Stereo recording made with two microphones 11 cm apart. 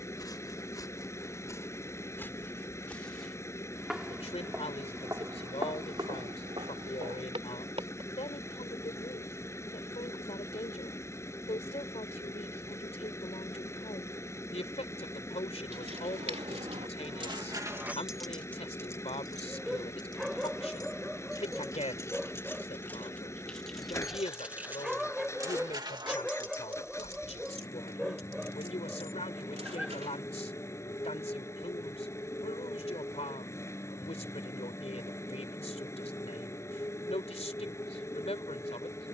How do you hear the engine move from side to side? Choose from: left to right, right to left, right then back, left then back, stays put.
stays put.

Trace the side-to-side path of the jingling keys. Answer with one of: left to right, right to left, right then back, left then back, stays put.
left then back.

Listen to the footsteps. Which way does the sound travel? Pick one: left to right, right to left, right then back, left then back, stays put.
left to right.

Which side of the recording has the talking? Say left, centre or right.
left.